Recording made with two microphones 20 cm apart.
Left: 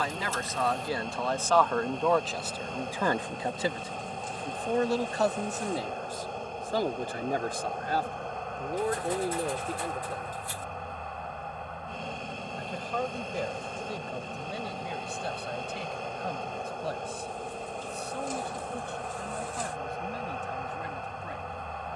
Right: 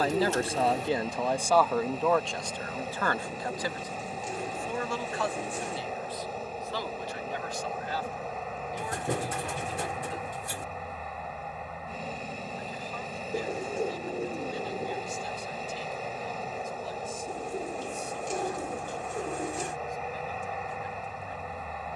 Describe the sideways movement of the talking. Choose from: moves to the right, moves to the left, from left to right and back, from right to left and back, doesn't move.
moves to the left.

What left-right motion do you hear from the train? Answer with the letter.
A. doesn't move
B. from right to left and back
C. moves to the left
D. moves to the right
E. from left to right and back
A.